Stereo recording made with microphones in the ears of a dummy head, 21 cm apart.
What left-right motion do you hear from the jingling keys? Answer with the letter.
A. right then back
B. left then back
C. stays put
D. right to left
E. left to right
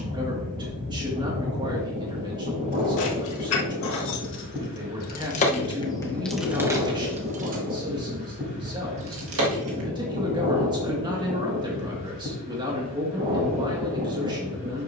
E.